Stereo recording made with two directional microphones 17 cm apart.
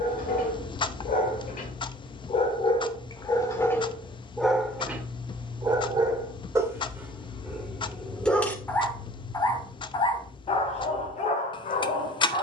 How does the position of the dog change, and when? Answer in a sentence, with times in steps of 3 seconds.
In this clip you hear the dog on the left from 0 s, in the centre from 3 s and on the left from 9 s.